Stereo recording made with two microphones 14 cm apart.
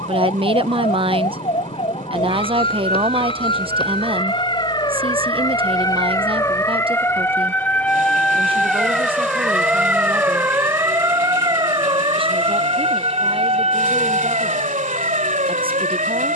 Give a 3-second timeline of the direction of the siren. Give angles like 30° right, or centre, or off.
50° left, 30° left, 10° left, 20° right, 40° right, 60° right.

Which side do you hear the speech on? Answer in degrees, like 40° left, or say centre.
40° right.